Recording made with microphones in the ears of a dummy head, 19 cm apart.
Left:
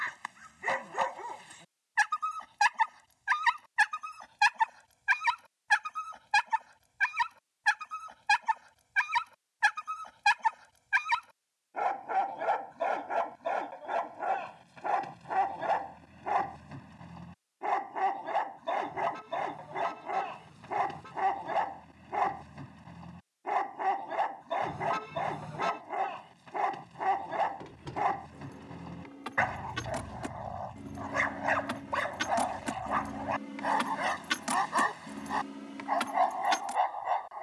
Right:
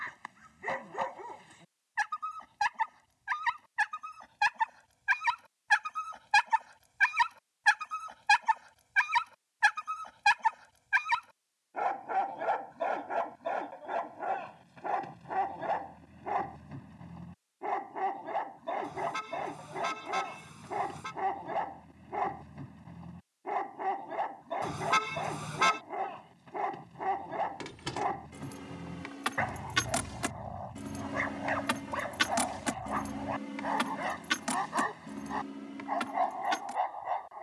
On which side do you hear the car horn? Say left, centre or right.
right.